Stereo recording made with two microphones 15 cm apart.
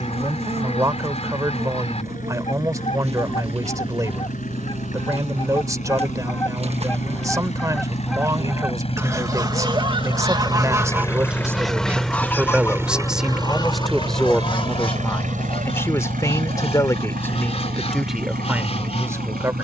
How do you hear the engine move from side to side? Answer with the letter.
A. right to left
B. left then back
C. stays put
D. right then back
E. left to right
E.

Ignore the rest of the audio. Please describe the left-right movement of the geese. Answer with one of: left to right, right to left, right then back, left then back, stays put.
right then back.